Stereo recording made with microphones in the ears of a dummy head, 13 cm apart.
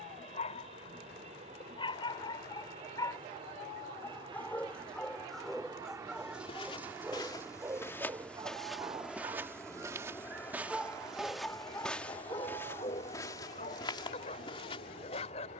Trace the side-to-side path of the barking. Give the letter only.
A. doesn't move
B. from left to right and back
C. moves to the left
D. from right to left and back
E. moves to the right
B.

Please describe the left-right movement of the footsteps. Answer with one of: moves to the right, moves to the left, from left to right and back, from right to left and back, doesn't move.
from left to right and back.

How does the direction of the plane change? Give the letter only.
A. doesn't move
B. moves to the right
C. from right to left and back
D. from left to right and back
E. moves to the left
E.